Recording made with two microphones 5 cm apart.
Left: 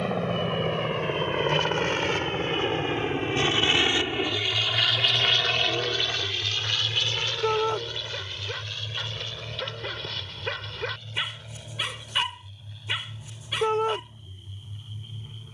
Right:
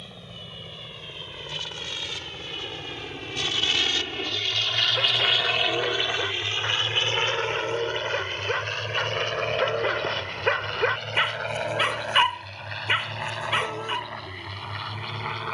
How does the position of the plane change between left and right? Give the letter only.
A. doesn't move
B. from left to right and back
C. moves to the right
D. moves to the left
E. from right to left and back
C.